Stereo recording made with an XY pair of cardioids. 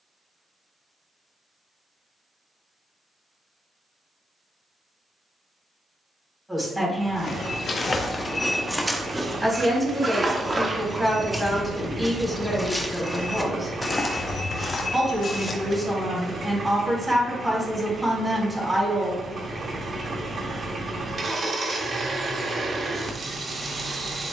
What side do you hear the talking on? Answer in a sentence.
You can hear the talking in the centre.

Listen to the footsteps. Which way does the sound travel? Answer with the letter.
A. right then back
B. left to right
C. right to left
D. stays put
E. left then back
A.